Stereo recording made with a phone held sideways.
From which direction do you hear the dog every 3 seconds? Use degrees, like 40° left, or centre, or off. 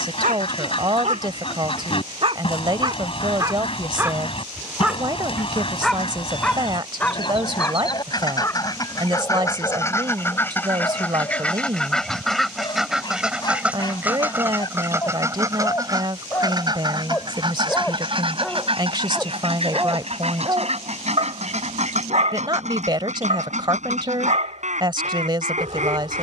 50° right, 10° right, 20° left, 30° left, 30° left, 20° left, 20° right, 60° right, 60° right.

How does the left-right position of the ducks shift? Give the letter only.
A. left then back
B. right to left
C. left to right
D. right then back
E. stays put
C.